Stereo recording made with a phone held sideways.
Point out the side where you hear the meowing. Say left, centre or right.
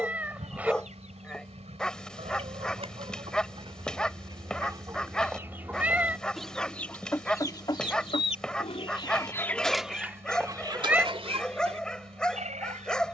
centre.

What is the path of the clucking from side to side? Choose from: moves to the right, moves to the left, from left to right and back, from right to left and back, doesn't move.
from right to left and back.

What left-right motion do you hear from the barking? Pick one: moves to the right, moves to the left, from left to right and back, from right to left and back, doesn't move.
doesn't move.